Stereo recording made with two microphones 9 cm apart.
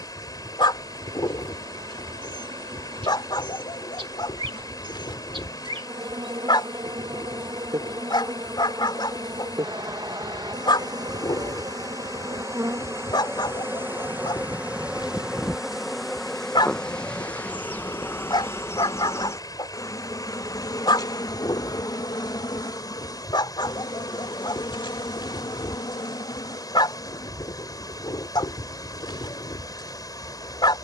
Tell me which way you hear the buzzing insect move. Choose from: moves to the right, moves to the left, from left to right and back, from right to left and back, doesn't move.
moves to the left.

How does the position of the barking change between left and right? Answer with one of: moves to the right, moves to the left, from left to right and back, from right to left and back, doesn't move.
doesn't move.